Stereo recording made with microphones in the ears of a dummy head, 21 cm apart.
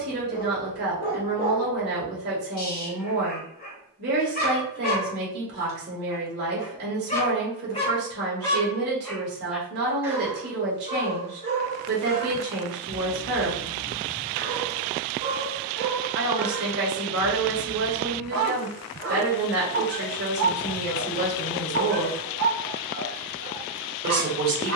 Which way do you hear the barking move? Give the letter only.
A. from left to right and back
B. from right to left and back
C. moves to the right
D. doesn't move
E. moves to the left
C.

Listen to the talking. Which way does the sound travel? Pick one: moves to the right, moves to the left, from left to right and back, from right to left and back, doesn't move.
doesn't move.